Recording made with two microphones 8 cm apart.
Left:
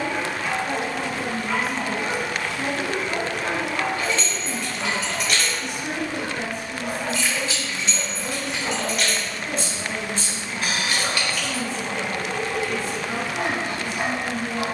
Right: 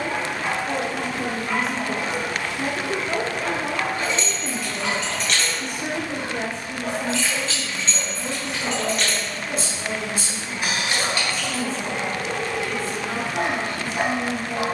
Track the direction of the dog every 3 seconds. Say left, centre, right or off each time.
centre, left, centre, right, right.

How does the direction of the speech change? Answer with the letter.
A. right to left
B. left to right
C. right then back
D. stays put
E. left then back
C.